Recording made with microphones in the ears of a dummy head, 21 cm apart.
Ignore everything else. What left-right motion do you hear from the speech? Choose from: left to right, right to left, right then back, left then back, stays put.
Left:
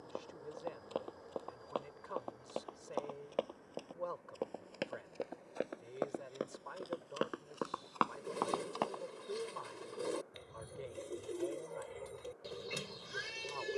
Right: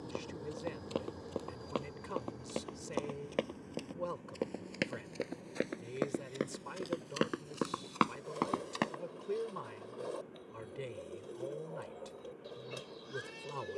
stays put.